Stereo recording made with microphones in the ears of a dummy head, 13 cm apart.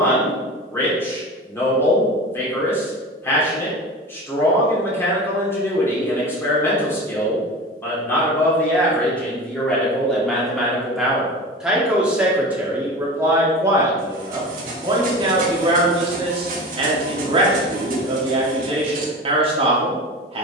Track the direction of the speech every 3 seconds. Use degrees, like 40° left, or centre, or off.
20° left, 20° left, 10° left, centre, 20° right, 40° right, 40° right.